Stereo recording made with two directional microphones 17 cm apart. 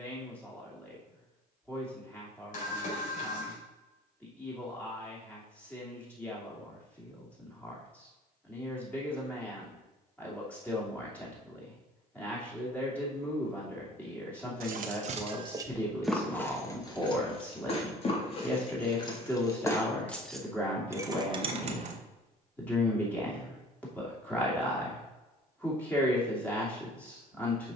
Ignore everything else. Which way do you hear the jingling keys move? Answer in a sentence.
You can hear the jingling keys go left and come back.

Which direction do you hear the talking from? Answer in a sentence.
In this clip you hear the talking in the centre.